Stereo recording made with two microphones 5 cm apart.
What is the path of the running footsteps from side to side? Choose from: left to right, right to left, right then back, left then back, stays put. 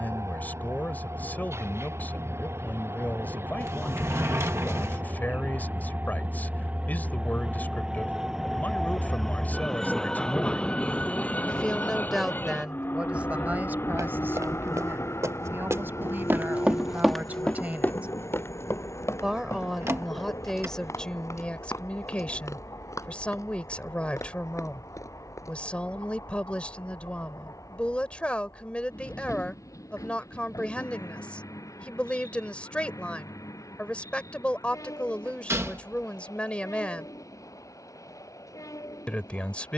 right to left.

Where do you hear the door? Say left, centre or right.
right.